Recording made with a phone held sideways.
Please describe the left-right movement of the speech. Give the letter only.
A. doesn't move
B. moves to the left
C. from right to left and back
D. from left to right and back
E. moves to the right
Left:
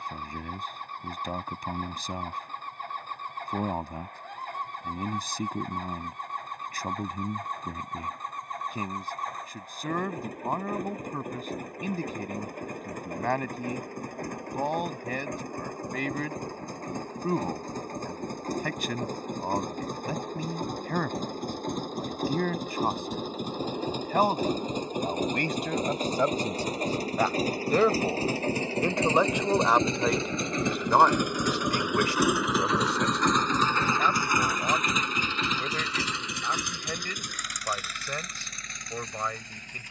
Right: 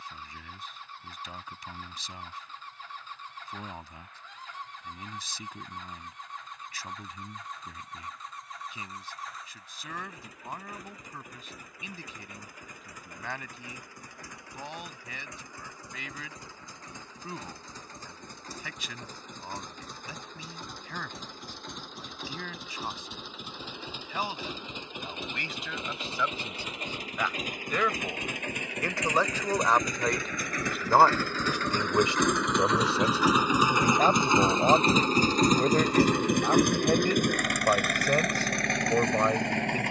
E.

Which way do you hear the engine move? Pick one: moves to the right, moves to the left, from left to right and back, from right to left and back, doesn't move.
moves to the right.